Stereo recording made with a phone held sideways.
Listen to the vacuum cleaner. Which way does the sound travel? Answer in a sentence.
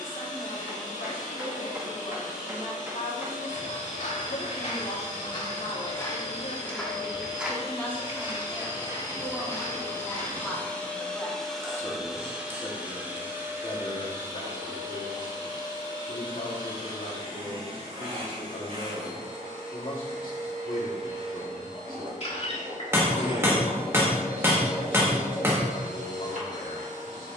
In this clip you hear the vacuum cleaner travel towards the right.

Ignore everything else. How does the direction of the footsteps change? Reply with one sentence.
You can hear the footsteps move to the right.